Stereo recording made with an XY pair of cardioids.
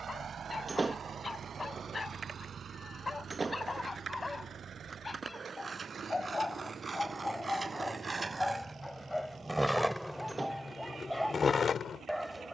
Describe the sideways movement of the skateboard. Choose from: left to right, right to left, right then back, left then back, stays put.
right to left.